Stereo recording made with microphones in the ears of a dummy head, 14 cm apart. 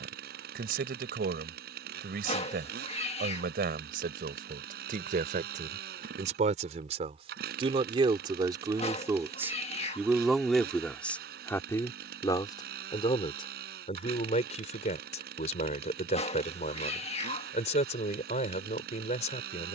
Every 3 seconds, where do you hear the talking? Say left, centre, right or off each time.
right, right, right, centre, left, left, left.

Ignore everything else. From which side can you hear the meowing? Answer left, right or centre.
left.